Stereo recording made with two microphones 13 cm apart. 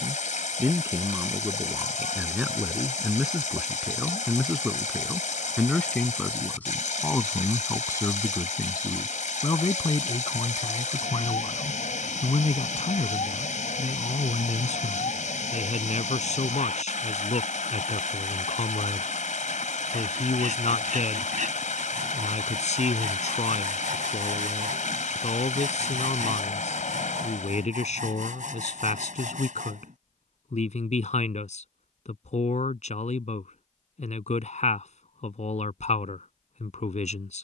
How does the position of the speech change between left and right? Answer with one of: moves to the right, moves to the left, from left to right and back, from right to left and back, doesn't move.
moves to the left.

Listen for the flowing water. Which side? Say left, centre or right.
left.